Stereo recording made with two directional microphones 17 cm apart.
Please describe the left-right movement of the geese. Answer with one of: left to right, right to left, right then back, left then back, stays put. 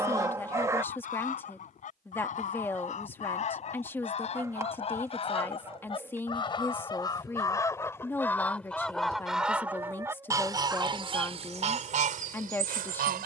left to right.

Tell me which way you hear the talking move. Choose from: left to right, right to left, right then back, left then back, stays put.
stays put.